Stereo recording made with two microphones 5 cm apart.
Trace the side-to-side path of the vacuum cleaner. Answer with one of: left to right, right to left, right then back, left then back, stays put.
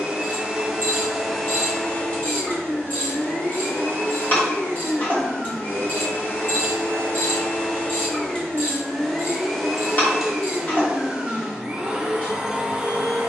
left then back.